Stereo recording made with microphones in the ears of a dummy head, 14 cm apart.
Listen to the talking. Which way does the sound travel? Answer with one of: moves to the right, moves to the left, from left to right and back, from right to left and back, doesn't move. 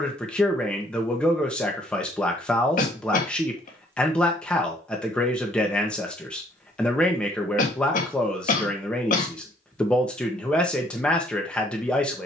doesn't move.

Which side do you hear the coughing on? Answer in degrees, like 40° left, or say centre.
50° left.